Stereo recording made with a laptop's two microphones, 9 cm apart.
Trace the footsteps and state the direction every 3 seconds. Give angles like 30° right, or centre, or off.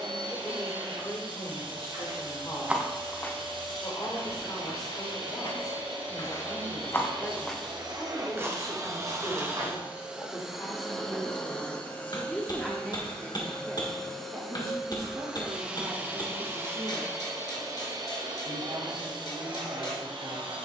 30° right, 50° left, centre, 50° right, off, off, off.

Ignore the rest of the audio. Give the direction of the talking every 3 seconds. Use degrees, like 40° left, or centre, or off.
40° left, 40° left, 40° left, 30° left, 20° right, 50° right, 70° right.